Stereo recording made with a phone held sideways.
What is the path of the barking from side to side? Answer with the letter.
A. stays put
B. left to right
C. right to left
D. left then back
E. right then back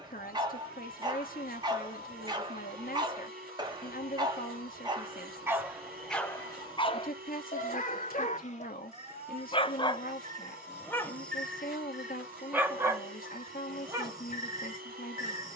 D.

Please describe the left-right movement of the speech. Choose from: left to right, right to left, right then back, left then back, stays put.
stays put.